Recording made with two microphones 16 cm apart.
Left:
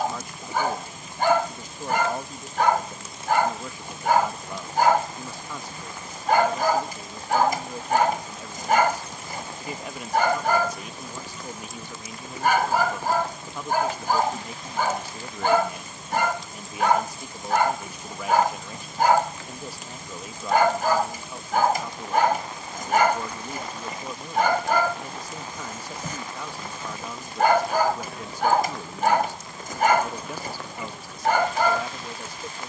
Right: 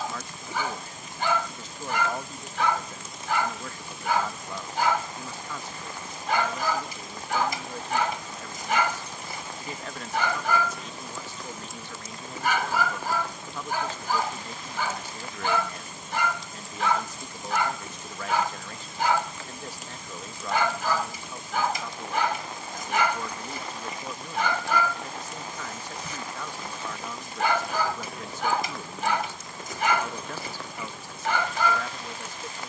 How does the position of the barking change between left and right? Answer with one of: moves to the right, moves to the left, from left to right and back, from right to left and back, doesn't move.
doesn't move.